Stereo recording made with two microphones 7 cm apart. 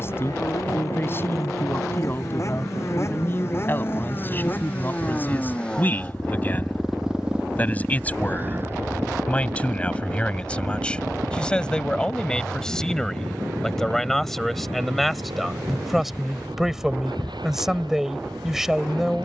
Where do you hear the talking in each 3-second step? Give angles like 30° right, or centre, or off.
30° left, 30° left, 20° left, 20° left, 10° left, centre, 10° right.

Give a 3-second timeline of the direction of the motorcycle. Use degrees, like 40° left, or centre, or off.
50° left, 30° left, 10° right, 50° right, 70° right, 80° right, 80° right.